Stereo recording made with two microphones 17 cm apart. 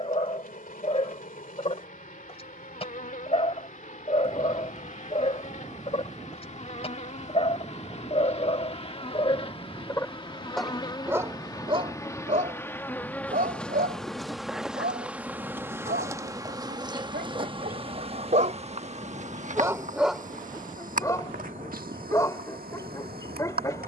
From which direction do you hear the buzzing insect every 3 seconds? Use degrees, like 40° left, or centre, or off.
50° left, 50° left, 40° left, 30° left, 10° left, 20° right, 50° right, 60° right.